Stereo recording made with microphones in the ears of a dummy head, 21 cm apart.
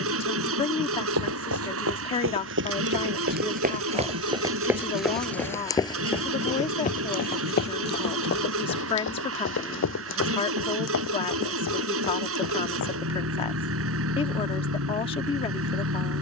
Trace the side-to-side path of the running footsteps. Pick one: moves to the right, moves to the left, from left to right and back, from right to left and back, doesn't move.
moves to the left.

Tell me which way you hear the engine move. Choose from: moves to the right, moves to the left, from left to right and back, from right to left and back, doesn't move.
doesn't move.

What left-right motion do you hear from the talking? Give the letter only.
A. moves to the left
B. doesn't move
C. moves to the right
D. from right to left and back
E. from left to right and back
B.